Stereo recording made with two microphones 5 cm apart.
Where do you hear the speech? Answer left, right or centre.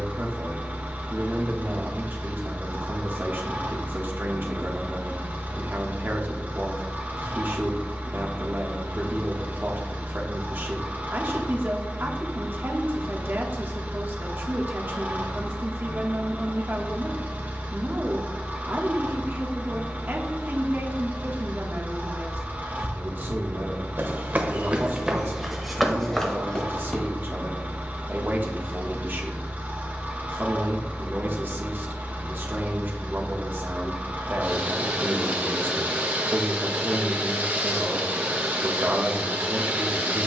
right.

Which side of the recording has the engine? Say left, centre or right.
right.